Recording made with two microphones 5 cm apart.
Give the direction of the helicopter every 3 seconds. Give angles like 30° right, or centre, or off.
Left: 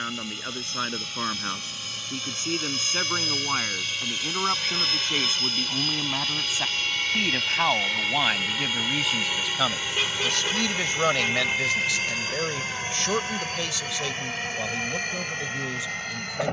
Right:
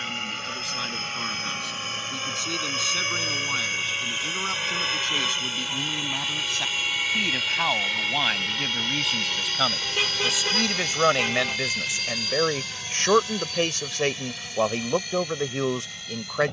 40° right, 20° right, centre, 20° left, 40° left, 50° left.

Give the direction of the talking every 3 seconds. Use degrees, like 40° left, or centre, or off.
30° left, 20° left, 10° left, 10° right, 40° right, 60° right.